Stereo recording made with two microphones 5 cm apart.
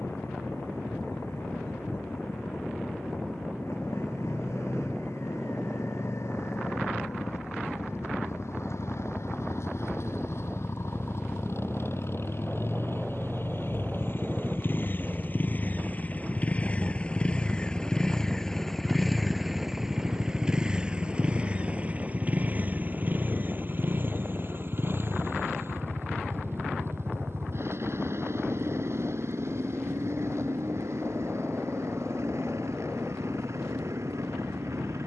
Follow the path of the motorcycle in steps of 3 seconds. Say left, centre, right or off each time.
left, left, left, left, left, left, centre, right, right, right, right, right.